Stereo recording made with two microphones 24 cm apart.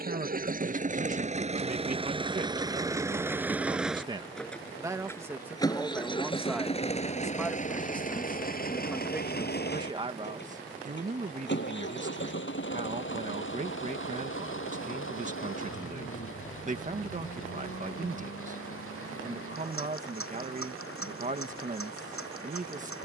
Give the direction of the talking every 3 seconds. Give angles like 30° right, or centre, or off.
40° right, 10° right, centre, 30° right, 30° right, 30° right, 30° right, 30° right.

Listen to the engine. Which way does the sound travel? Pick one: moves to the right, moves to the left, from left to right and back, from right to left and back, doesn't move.
moves to the left.